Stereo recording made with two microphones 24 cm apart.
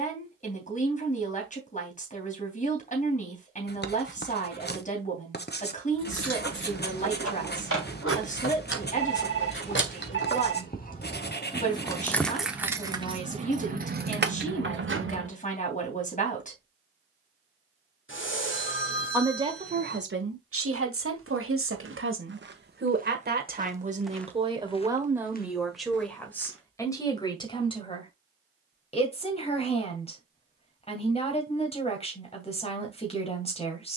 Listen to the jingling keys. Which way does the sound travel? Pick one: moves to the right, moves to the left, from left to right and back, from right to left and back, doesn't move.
moves to the right.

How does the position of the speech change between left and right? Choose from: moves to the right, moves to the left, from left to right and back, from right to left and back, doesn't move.
from left to right and back.